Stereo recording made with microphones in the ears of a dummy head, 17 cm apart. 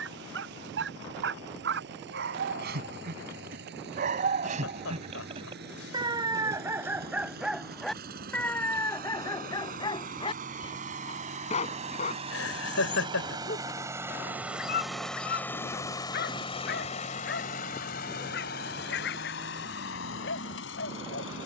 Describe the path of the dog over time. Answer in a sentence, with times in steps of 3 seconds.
In this clip you hear the dog on the right from 0 s, in the centre from 6 s and on the left from 9 s.